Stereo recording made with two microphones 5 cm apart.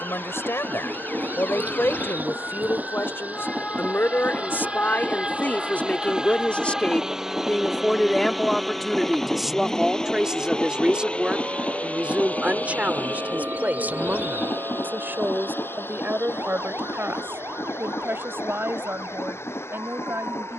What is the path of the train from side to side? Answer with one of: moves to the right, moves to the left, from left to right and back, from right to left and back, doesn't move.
moves to the left.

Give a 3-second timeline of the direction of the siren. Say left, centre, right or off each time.
left, left, centre, right, right, right, right.